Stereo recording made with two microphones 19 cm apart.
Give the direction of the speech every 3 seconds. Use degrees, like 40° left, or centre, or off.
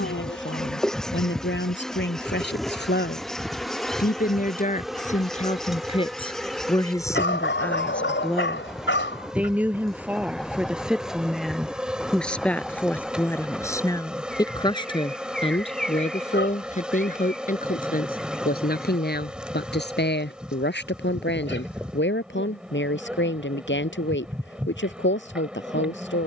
70° left, 40° left, 10° left, centre, 10° left, 40° left, 60° left, 70° left, 80° left.